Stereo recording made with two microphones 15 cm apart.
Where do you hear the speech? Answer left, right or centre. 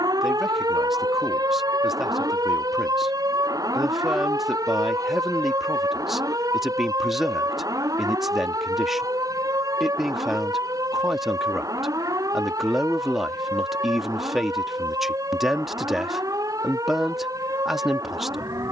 centre.